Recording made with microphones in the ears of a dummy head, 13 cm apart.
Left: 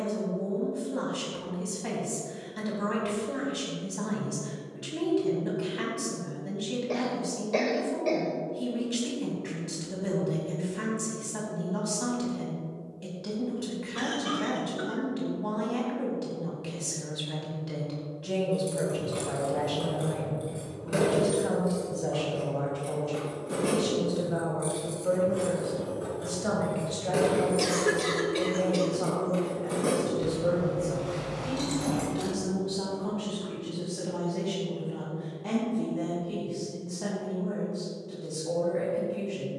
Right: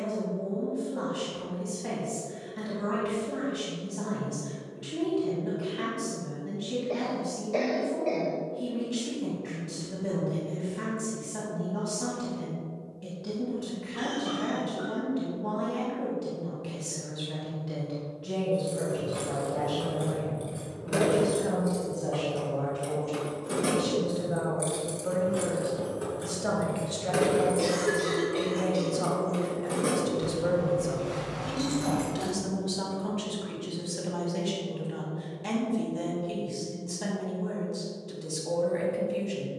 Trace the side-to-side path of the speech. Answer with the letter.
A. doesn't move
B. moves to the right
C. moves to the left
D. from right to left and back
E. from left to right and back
B.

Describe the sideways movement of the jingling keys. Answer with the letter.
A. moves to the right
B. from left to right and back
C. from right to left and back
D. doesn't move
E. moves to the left
B.